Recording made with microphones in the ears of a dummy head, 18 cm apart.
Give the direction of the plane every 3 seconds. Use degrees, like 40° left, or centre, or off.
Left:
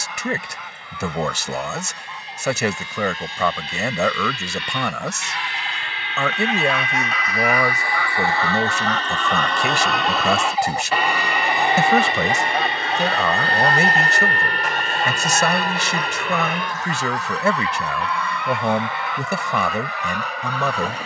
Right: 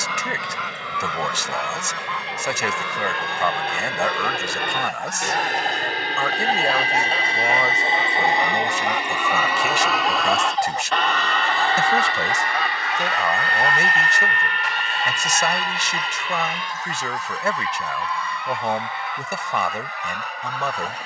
60° right, 50° right, 30° right, centre, 20° left, 40° left, 50° left.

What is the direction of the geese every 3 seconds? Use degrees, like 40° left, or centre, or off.
60° right, 50° right, 20° right, 10° left, 30° left, 50° left, 60° left.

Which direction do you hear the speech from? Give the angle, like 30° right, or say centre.
70° left.